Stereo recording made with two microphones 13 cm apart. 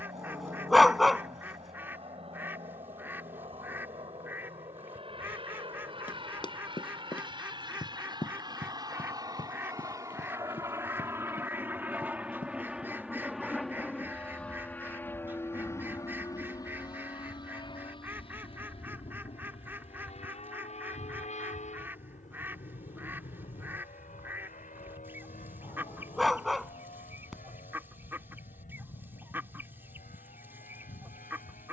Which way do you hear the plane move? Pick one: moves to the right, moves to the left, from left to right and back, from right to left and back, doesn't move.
moves to the left.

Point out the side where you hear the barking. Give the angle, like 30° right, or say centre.
centre.